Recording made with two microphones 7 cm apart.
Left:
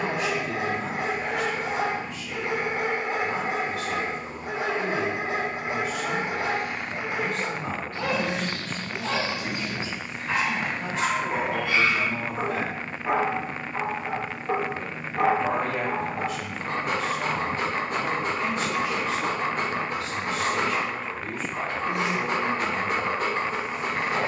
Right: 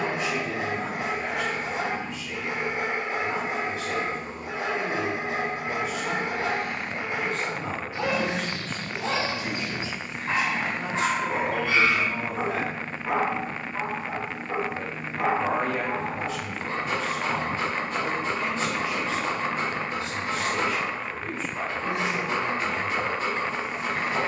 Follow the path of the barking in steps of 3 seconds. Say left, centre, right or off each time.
left, left, centre, right, left, left, left, left.